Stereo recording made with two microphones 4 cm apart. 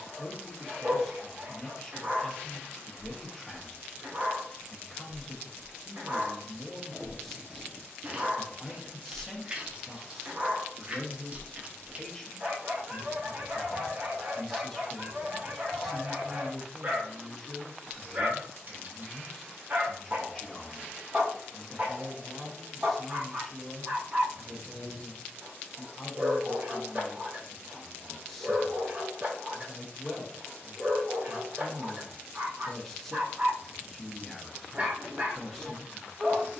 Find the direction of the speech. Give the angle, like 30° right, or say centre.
10° left.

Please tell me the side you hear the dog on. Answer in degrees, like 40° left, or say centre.
40° right.